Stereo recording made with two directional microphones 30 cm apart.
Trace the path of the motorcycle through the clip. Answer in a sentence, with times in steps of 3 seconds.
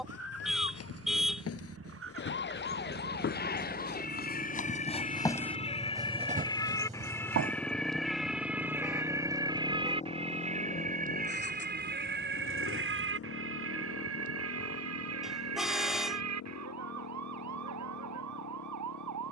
In this clip you hear the motorcycle on the right from 0 s, in the centre from 6 s and on the left from 9 s.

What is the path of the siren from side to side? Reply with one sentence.
You can hear the siren travel towards the right.